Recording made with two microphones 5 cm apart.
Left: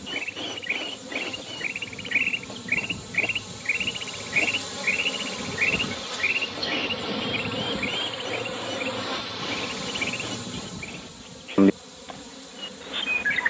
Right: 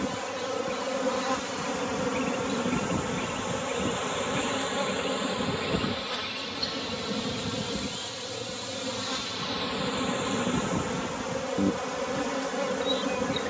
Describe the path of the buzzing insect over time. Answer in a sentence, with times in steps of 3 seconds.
You can hear the buzzing insect on the right from 0 s, in the centre from 6 s and on the right from 9 s.